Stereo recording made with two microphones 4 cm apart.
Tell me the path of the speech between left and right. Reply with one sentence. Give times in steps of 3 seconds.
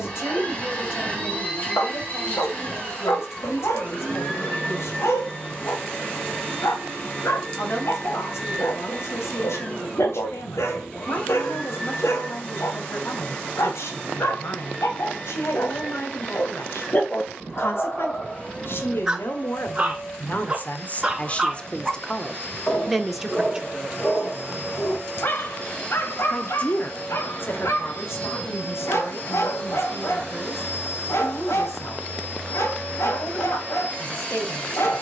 In this clip you hear the speech on the left from 0 s, in the centre from 21 s and on the left from 24 s.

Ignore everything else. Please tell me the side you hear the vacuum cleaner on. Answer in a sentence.
You can hear the vacuum cleaner on the left.